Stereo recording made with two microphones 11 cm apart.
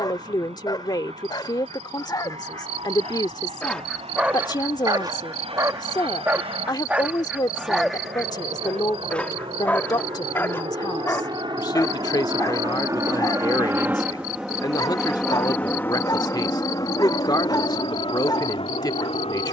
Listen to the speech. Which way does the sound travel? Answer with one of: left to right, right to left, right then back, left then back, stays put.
stays put.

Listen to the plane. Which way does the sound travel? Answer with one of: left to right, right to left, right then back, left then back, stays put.
right to left.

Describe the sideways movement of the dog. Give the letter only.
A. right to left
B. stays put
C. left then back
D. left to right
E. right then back
E.